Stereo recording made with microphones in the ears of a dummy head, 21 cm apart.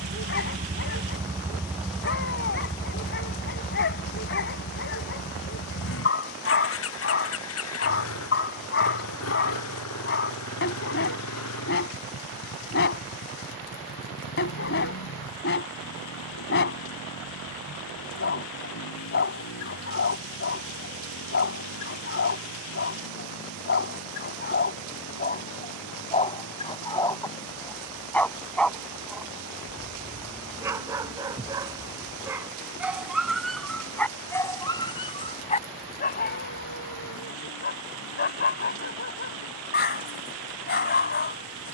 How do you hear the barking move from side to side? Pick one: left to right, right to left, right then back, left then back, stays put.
right then back.